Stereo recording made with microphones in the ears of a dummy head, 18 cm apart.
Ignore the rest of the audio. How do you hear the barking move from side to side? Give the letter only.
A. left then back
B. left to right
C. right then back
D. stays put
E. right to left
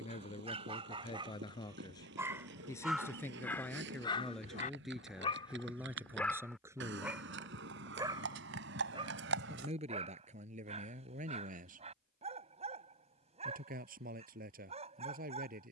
A.